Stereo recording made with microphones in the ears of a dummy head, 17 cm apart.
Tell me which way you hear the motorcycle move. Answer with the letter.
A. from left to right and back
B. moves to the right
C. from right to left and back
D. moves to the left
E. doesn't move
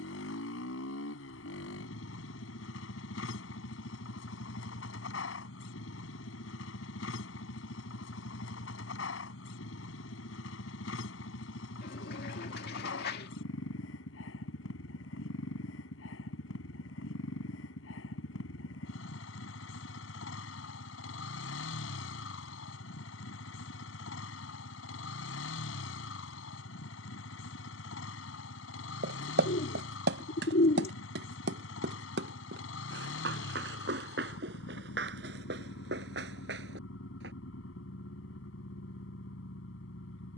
E.